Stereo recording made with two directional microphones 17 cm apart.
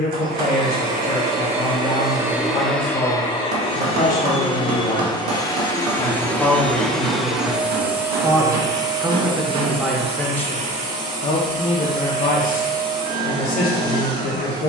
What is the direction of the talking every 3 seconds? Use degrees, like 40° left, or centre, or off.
60° left, 50° left, 10° right, 10° left, 50° left.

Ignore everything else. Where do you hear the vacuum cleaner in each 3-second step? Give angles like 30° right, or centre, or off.
30° right, 30° left, 10° right, 40° right, 60° right.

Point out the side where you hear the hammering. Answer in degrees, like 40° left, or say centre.
70° right.